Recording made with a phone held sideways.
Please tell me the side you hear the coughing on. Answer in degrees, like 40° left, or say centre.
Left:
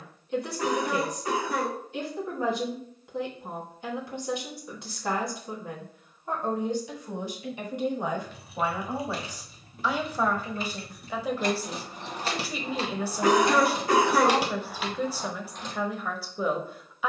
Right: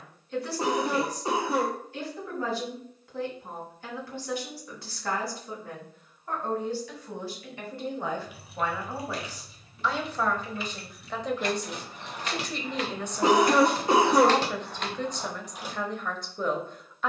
20° right.